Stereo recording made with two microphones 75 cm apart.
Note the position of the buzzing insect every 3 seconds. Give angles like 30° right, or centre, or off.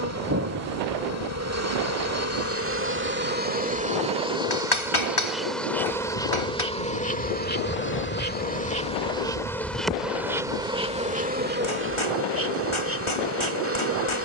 20° right, 10° right, 10° left, centre, 20° right.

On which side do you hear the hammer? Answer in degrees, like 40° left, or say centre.
40° left.